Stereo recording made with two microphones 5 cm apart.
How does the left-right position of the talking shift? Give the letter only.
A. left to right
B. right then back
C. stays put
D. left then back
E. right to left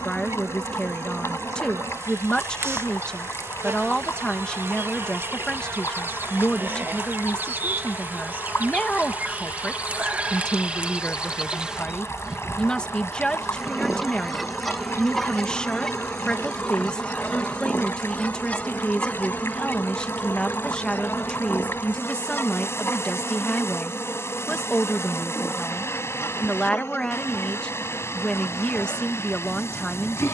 C.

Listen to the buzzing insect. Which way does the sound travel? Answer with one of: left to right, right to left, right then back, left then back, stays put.
right to left.